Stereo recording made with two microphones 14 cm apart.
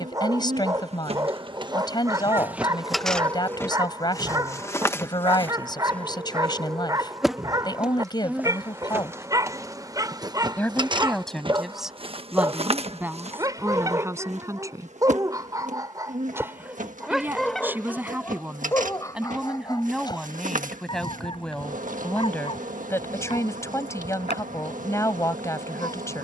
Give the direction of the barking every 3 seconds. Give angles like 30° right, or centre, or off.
30° right, 30° right, 30° right, 30° right, 30° right, 10° right, 20° left, 40° left, 50° left.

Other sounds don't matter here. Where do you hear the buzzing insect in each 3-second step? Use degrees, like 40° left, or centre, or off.
30° right, 10° left, centre, 30° right, 50° right, 60° right, 70° right, 70° right, 70° right.